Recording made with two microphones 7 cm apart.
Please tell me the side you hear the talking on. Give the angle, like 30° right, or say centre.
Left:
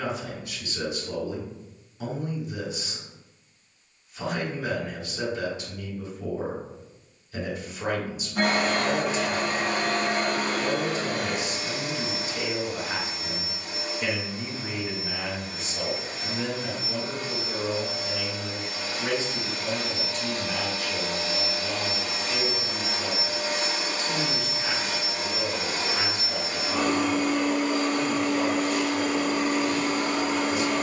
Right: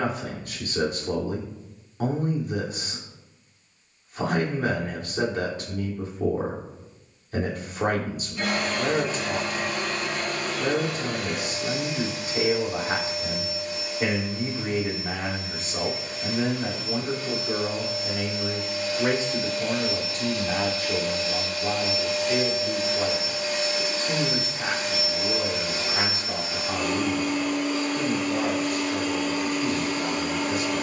50° right.